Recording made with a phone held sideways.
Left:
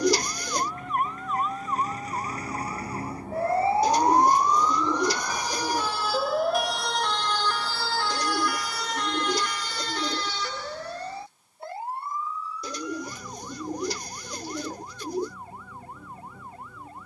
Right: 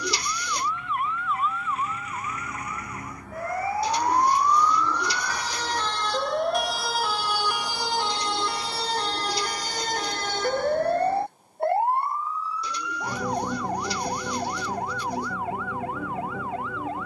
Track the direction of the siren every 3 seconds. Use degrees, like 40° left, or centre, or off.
40° left, 20° left, 10° right, 50° right, 70° right, 80° right.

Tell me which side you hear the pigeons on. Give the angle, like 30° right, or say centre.
50° left.